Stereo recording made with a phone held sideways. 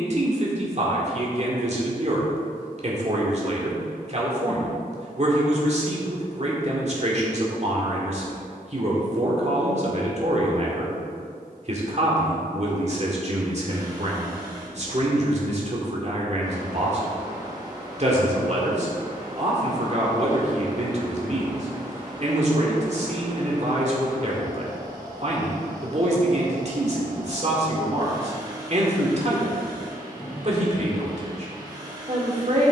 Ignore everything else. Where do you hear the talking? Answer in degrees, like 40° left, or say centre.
50° right.